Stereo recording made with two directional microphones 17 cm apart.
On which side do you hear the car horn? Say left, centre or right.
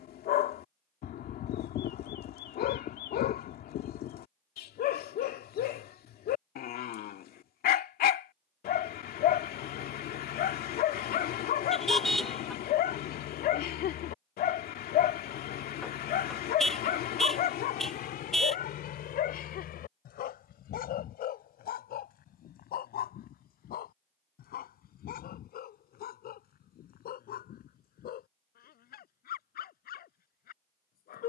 centre.